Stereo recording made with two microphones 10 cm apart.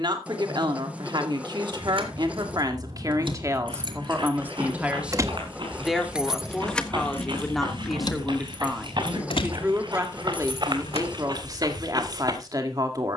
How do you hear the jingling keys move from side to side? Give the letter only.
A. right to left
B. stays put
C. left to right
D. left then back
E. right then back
A.